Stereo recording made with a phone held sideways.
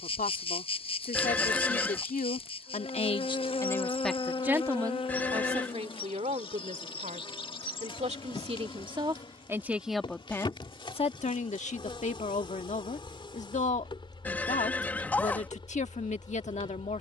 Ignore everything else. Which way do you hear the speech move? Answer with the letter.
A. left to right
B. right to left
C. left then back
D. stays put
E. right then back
E.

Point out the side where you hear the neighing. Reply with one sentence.
You can hear the neighing in the centre.